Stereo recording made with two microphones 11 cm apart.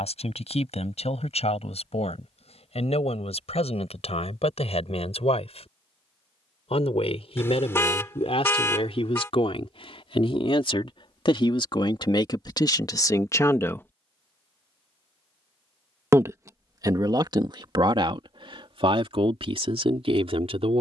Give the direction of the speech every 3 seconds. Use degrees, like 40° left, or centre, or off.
80° left, 70° left, 70° left, 60° left, 30° left, 40° right, 60° right.